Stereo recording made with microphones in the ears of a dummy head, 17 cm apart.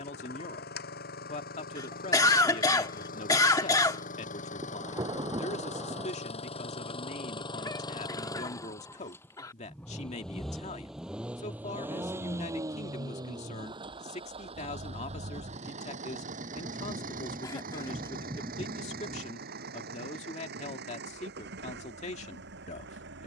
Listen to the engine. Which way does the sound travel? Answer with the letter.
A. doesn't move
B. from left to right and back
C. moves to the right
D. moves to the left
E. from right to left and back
C.